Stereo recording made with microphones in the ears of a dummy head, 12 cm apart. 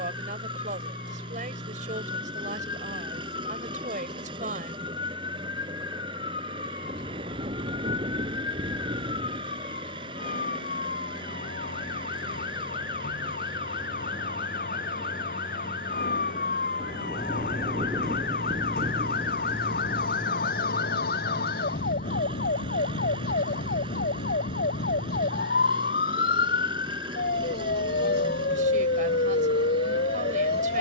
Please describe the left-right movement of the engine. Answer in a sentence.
You can hear the engine stay put.